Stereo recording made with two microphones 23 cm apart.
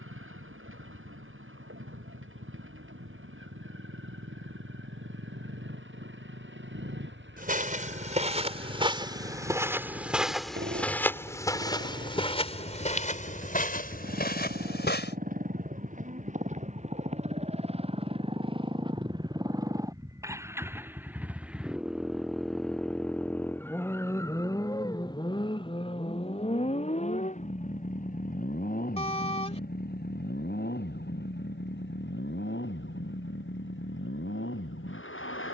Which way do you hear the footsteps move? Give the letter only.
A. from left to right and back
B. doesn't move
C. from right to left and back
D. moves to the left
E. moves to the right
D.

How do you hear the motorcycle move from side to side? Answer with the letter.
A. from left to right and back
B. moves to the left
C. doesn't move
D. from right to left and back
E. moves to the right
B.